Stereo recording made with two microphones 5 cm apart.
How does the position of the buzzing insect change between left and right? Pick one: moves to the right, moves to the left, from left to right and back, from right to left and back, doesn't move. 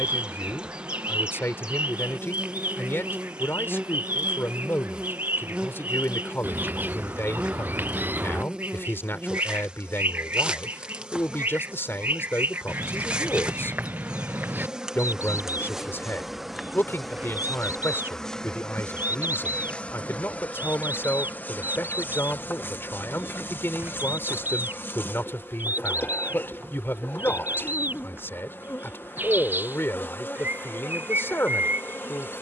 moves to the left.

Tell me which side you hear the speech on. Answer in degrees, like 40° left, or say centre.
50° left.